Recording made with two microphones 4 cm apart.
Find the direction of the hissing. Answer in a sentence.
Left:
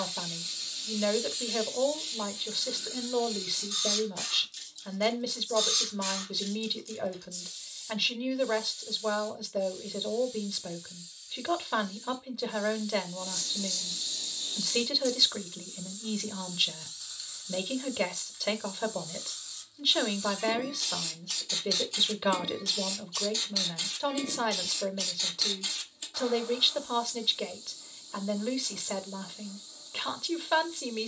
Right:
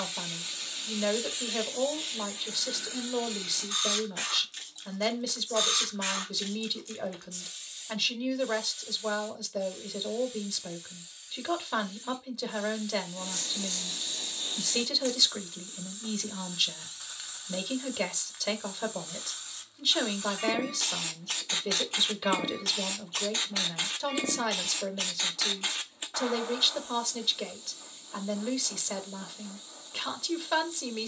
You can hear the hissing on the right.